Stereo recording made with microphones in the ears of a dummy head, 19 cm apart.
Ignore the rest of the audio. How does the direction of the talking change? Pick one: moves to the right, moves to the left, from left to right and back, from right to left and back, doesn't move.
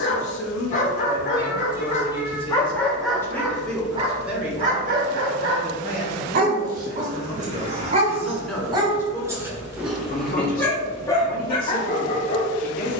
from left to right and back.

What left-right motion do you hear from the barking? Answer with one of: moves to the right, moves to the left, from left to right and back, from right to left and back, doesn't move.
from left to right and back.